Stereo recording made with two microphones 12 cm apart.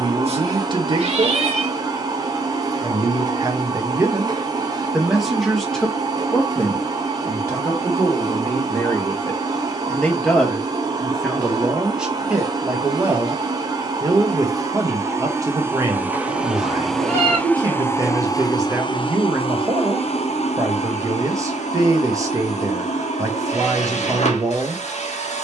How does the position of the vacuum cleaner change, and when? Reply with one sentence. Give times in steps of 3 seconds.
In this clip you hear the vacuum cleaner on the right from 0 s, in the centre from 15 s and on the left from 18 s.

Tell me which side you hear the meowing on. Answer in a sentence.
You can hear the meowing on the right.